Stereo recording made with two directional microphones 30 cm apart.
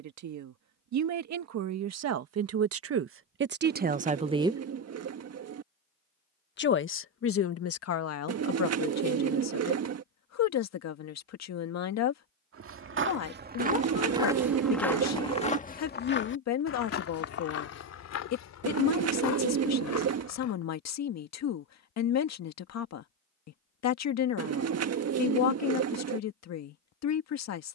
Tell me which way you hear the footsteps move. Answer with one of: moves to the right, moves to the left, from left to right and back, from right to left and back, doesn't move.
moves to the left.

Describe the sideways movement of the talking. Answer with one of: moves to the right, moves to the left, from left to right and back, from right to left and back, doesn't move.
moves to the left.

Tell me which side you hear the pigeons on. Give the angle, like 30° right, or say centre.
60° right.